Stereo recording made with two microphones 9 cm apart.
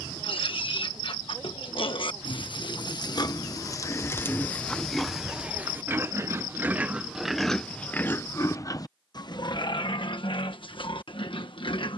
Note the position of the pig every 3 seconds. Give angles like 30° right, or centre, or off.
60° left, 20° left, centre, 60° left.